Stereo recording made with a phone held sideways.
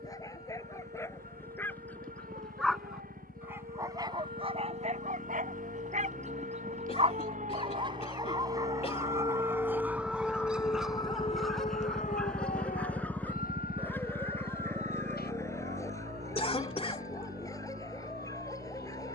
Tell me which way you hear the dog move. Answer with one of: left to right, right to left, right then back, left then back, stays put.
right then back.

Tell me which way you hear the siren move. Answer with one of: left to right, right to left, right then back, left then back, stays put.
right to left.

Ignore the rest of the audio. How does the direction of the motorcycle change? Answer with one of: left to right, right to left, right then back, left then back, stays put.
left to right.